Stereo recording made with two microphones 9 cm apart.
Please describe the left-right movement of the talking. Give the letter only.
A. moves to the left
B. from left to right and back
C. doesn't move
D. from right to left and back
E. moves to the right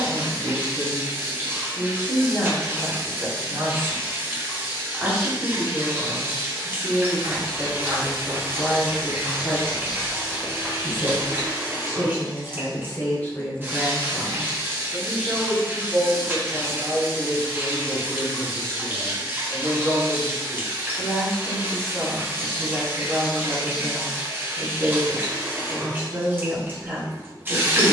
D.